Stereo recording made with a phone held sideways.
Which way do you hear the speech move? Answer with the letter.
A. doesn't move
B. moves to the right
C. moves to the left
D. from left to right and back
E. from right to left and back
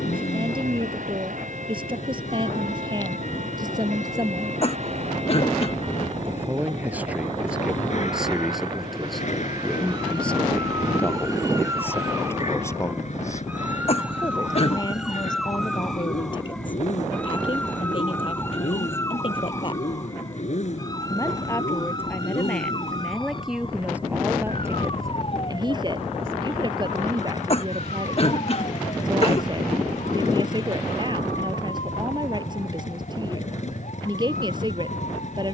E.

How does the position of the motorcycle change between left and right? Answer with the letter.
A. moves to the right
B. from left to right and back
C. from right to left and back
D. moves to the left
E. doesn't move
E.